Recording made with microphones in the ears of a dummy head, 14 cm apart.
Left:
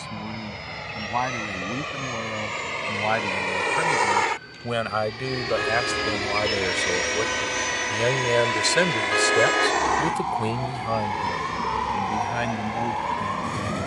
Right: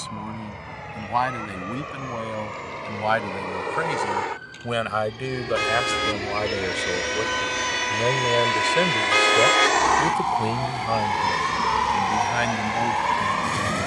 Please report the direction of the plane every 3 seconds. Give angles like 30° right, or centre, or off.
70° left, 50° left, 10° left, 30° right, 40° right.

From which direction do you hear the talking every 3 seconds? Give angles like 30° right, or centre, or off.
30° right, 10° right, 20° left, 10° left, 30° right.